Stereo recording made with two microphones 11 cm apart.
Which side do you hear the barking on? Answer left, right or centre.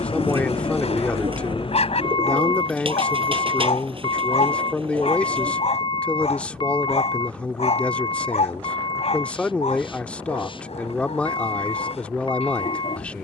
left.